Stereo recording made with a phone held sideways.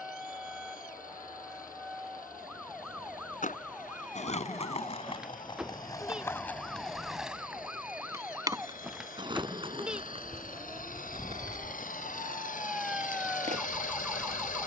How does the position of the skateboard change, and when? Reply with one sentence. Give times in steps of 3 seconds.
In this clip you hear the skateboard not at all from 0 s, on the left from 3 s, in the centre from 6 s and on the right from 9 s.